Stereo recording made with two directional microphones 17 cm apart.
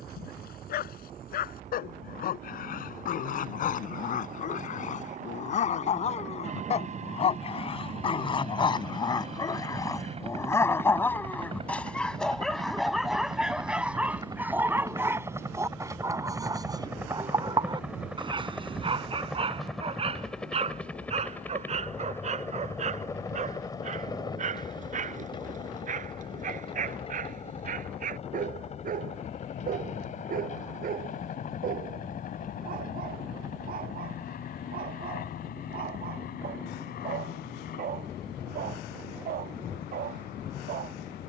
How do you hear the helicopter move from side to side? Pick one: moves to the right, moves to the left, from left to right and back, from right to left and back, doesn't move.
moves to the left.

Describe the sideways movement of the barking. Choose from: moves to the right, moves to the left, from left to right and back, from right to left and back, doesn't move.
moves to the right.